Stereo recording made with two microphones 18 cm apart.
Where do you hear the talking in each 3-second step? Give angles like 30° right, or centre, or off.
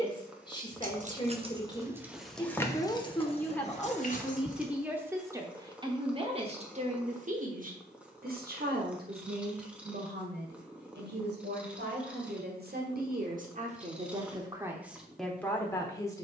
20° left, centre, 50° right, 70° right, 40° right, 10° left.